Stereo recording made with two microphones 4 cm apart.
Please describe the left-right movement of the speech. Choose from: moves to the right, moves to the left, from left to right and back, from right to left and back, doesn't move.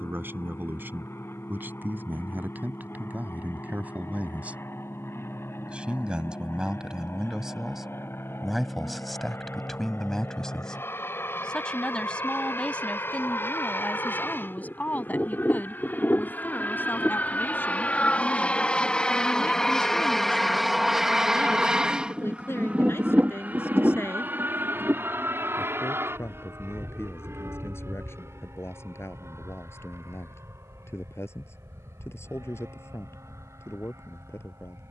moves to the left.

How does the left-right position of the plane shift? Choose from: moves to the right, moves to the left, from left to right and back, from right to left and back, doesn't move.
moves to the right.